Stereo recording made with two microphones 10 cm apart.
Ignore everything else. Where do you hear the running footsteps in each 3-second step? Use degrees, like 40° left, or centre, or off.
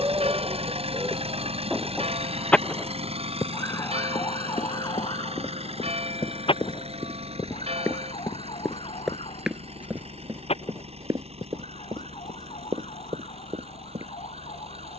off, 50° left, 20° left, 20° right, 50° right.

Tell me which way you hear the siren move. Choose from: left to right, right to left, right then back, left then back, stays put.
right to left.